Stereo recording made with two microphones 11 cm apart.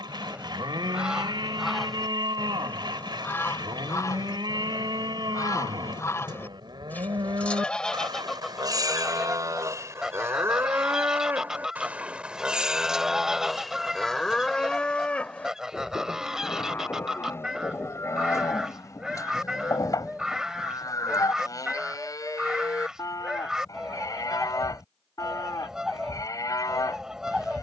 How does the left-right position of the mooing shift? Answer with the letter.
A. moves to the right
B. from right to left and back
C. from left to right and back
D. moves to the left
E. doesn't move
D.